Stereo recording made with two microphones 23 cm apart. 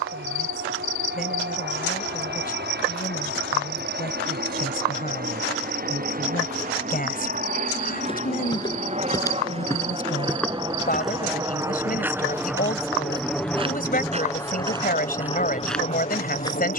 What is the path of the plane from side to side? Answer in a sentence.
In this clip you hear the plane go from the right side to the left.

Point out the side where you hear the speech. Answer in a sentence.
You can hear the speech on the left.